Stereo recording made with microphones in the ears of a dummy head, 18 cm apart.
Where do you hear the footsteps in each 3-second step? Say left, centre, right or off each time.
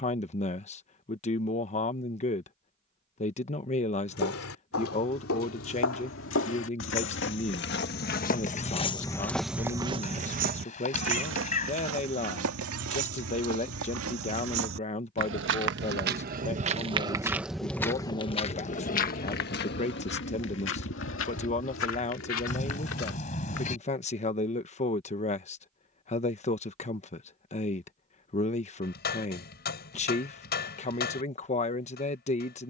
off, left, left, right, right, right, left, left, off, off, off.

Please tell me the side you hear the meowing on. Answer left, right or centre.
left.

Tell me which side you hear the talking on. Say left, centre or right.
left.